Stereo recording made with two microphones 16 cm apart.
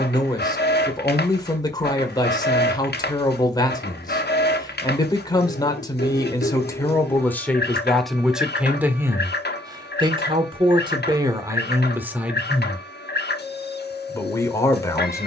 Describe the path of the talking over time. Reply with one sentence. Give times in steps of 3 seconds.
You can hear the talking on the left from 0 s, in the centre from 6 s, on the right from 9 s and in the centre from 12 s.